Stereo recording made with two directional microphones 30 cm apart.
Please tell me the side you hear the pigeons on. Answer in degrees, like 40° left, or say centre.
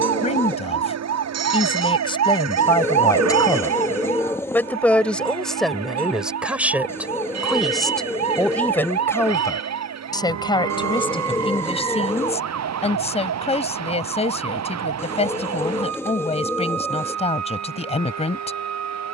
10° left.